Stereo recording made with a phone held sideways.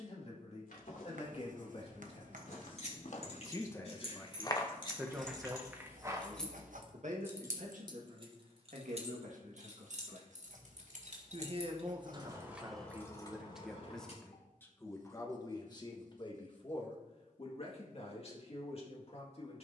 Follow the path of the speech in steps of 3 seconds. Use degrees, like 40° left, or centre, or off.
50° left, centre, 60° right, 50° right, 10° right, 30° left, 50° left.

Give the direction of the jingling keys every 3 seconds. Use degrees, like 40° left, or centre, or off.
50° left, 40° left, 20° right, 60° right, 20° left, off, off.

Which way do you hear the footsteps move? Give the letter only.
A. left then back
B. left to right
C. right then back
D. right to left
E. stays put
B.